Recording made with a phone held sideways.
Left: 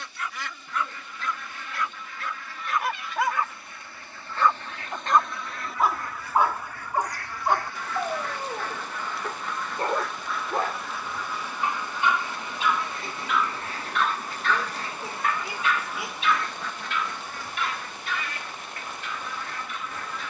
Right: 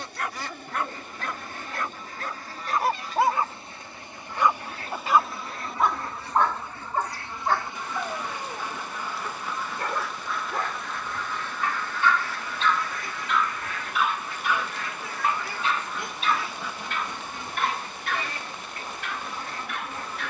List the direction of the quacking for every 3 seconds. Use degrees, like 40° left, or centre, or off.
40° right, 40° right, 20° right, centre, 30° left, centre, 30° right.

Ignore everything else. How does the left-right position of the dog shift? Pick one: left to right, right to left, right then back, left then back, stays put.
left then back.